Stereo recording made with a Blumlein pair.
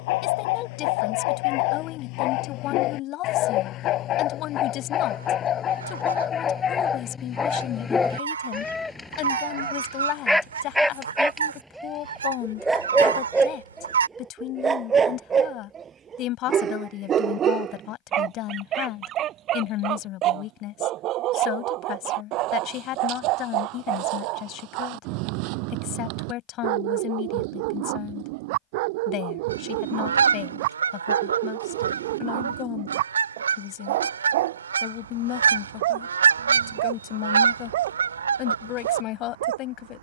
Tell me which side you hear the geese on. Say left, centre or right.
right.